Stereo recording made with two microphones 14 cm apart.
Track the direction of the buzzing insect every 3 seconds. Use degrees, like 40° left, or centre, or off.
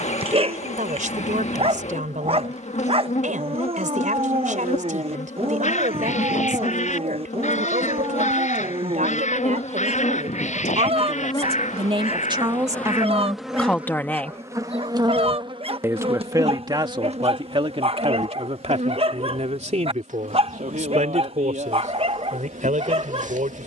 60° left, 60° left, 60° left, 40° left, centre, 50° right, 60° right, 70° right.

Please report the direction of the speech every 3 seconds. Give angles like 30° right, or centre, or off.
70° right, 70° right, 70° right, 60° right, 10° right, 30° right, 50° right, 70° right.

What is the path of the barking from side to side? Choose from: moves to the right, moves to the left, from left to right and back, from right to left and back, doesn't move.
doesn't move.